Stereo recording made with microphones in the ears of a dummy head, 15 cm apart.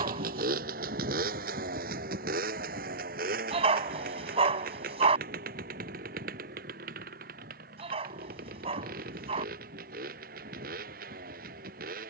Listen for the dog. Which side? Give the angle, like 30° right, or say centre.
40° right.